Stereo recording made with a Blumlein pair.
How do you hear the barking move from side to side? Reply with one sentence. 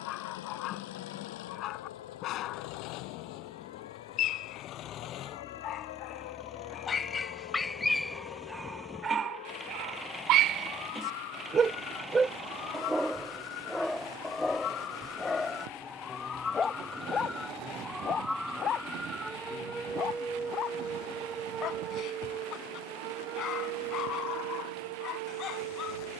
In this clip you hear the barking move from left to right and back again.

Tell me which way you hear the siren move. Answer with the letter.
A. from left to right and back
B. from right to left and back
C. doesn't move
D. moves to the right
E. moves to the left
D.